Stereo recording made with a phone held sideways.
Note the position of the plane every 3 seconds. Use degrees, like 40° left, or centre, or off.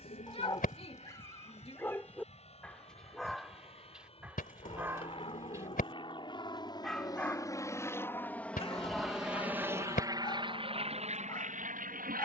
50° left, 40° left, 20° left, 30° right.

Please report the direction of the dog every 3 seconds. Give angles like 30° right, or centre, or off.
20° left, 10° right, 10° left, 30° left.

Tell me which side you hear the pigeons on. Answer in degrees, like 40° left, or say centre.
60° left.